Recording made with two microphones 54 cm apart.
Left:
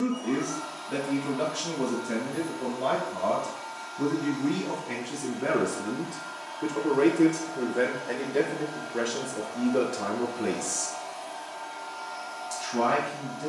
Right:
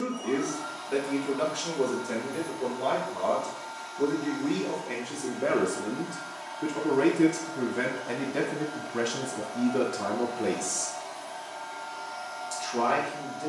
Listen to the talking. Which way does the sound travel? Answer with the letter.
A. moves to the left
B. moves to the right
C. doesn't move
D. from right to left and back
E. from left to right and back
E.